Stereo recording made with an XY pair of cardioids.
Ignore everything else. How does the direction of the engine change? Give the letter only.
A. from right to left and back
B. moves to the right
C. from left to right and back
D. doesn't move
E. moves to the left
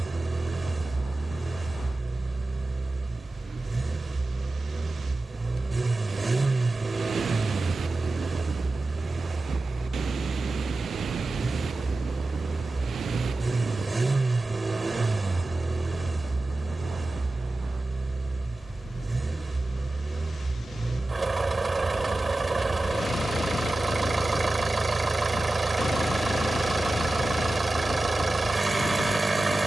D.